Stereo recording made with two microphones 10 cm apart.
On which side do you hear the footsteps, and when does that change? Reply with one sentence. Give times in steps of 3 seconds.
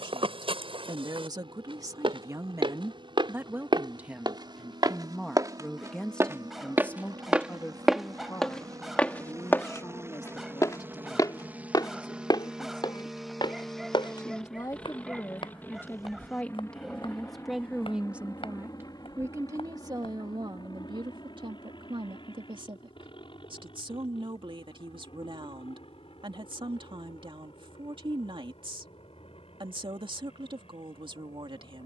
In this clip you hear the footsteps on the right from 0 s, in the centre from 6 s, on the left from 9 s and not at all from 21 s.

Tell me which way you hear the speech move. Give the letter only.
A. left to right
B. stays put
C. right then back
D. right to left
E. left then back
E.